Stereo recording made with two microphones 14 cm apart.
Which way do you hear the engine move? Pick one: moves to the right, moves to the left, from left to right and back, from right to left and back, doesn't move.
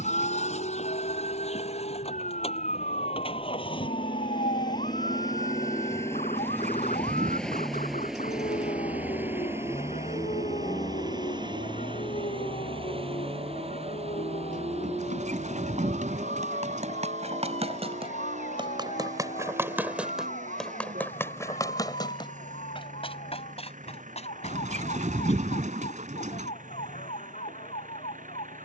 moves to the right.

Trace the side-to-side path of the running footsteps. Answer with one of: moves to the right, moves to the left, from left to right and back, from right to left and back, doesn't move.
moves to the left.